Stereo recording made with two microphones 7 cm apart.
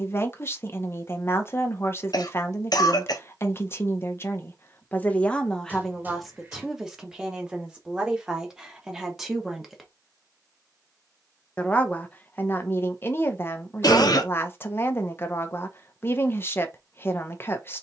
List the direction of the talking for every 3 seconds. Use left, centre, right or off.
left, left, centre, centre, left, left.